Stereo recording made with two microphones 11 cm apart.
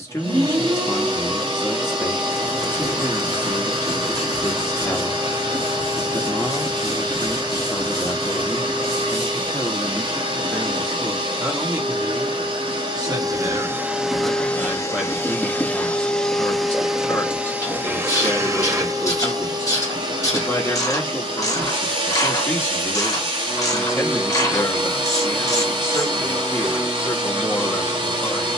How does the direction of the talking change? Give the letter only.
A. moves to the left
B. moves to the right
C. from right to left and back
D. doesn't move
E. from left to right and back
E.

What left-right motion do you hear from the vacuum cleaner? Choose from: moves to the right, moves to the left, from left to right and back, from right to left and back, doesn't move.
from right to left and back.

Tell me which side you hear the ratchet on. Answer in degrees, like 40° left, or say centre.
30° left.